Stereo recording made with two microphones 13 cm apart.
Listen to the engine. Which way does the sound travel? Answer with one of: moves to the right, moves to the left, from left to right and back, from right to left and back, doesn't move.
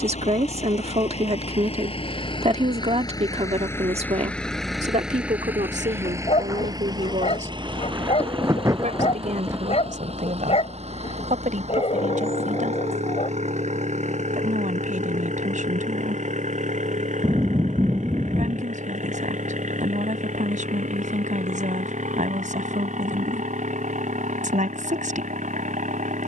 moves to the right.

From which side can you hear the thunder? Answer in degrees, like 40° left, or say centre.
20° right.